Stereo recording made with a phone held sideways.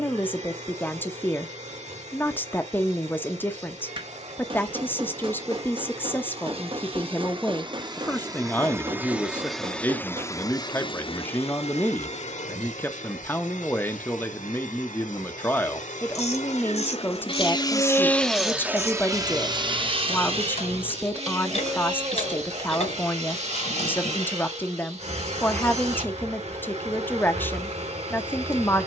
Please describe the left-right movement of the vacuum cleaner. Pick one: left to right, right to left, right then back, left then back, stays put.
left then back.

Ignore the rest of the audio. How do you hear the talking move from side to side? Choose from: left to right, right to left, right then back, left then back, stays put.
stays put.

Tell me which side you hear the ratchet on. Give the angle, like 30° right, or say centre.
50° left.